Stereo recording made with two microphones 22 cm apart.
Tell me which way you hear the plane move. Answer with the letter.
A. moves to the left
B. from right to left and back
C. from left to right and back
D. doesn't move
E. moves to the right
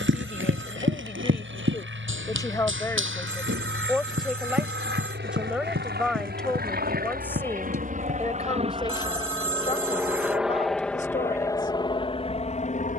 A.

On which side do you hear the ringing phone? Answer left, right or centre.
right.